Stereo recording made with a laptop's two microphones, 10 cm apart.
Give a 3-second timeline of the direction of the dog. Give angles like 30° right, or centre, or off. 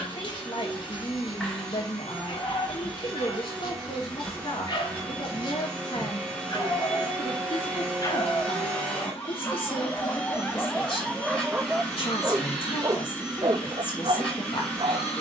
50° left, 50° left, 40° left, 10° left, 50° right.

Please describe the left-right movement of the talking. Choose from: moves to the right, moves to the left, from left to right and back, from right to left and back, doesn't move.
doesn't move.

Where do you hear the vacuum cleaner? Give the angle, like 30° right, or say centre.
10° left.